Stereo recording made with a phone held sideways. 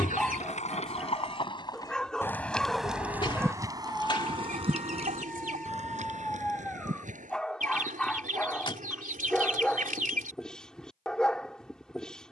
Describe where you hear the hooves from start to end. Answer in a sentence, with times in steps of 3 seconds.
In this clip you hear the hooves on the left from 0 s, on the right from 3 s and not at all from 9 s.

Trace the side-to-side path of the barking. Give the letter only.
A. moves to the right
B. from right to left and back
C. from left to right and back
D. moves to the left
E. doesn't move
E.